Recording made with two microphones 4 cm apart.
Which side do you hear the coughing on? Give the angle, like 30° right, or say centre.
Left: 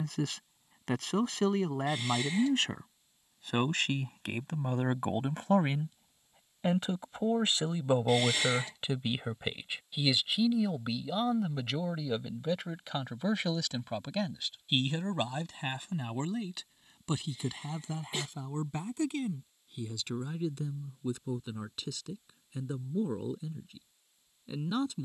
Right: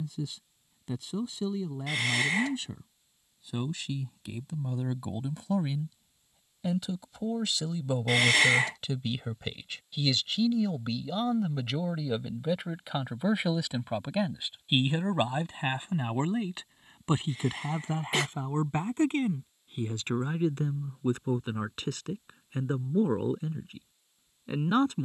70° right.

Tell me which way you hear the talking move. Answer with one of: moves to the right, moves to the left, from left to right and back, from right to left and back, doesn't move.
moves to the right.